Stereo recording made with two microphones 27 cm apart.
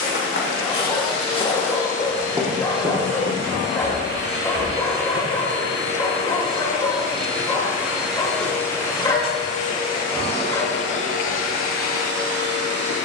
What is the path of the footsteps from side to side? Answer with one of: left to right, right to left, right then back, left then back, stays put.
left to right.